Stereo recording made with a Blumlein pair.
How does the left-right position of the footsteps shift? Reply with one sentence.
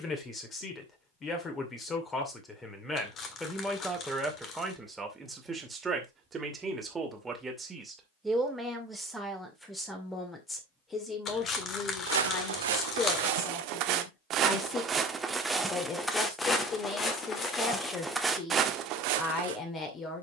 You can hear the footsteps go left and come back.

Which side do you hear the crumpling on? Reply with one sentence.
You can hear the crumpling on the left.